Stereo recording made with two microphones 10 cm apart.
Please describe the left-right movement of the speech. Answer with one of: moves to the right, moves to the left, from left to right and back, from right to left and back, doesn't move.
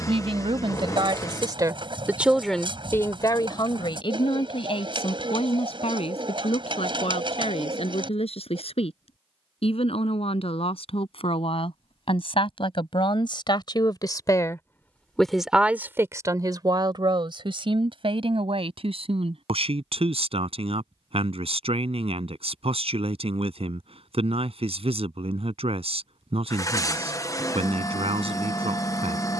from right to left and back.